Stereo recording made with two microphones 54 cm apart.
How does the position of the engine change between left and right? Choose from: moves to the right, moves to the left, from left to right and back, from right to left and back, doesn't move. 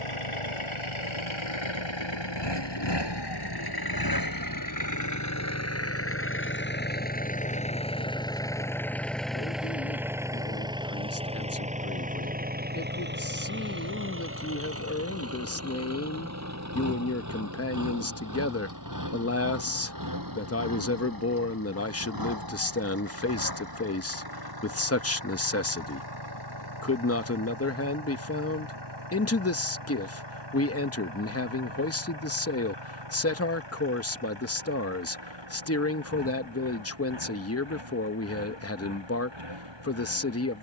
moves to the right.